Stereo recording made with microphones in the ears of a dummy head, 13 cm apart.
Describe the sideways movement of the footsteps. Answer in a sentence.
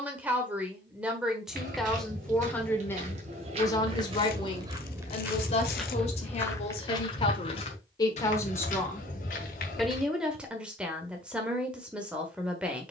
You can hear the footsteps go from the right side to the left.